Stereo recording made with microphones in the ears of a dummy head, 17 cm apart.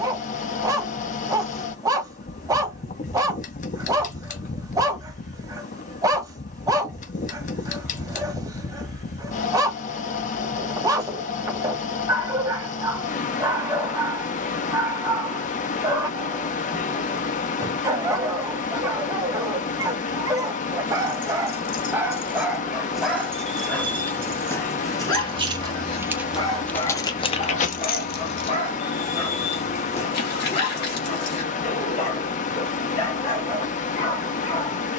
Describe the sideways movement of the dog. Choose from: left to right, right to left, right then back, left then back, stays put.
right to left.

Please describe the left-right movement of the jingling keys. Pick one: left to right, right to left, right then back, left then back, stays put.
right then back.